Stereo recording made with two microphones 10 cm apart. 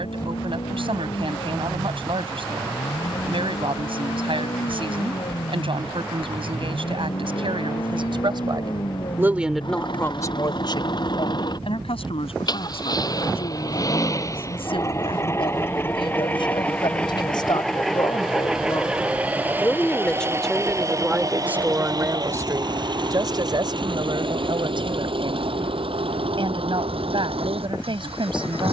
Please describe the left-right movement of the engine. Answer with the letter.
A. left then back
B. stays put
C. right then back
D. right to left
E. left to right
E.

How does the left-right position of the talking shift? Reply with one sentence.
You can hear the talking go left and come back.